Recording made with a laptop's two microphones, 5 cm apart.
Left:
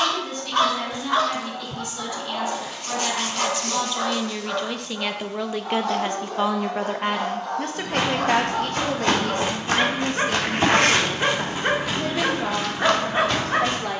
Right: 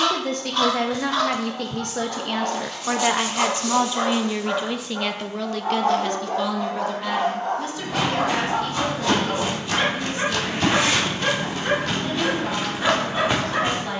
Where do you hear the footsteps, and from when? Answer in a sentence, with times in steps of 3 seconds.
You can hear the footsteps not at all from 0 s, on the left from 6 s and in the centre from 12 s.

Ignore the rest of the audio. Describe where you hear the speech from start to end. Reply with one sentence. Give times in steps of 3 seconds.
In this clip you hear the speech on the right from 0 s, in the centre from 3 s and on the left from 6 s.